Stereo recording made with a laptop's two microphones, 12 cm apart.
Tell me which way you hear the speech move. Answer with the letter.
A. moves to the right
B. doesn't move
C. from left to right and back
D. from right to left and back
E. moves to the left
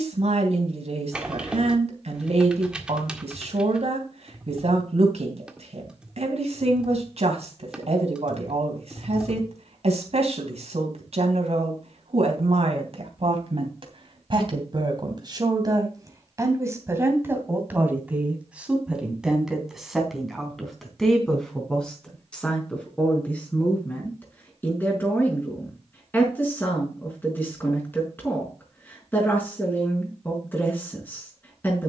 E.